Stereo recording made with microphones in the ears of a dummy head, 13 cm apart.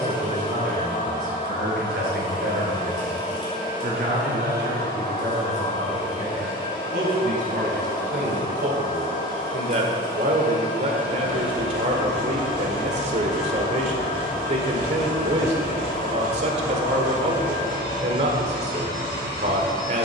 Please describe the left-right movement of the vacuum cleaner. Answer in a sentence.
You can hear the vacuum cleaner stay in one place.